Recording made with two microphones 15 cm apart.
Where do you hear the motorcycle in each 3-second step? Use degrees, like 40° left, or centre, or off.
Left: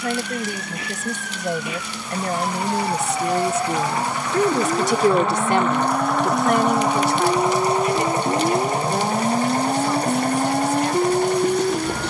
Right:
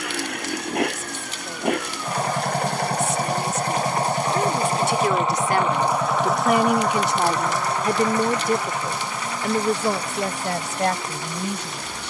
60° right, 30° right, 20° left, 40° left.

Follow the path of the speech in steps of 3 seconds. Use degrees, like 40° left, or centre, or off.
70° left, 40° left, 20° right, 60° right.